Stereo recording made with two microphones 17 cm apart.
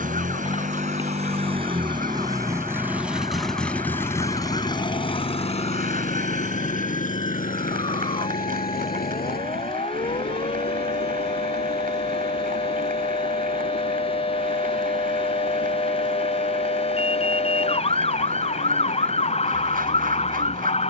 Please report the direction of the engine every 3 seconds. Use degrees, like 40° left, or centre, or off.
30° right, 20° left, 50° left, 70° left, 70° left, 80° left, 80° left.